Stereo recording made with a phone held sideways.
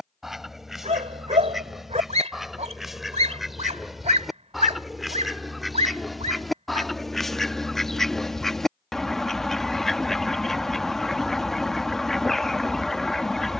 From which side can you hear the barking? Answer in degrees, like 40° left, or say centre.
50° right.